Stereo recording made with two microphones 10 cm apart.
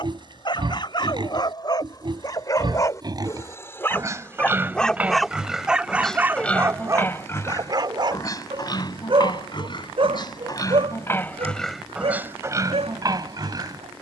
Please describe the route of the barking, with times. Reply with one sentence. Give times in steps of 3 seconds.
You can hear the barking on the left from 0 s, in the centre from 3 s and on the right from 6 s.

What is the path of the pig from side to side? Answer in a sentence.
You can hear the pig move from right to left and back again.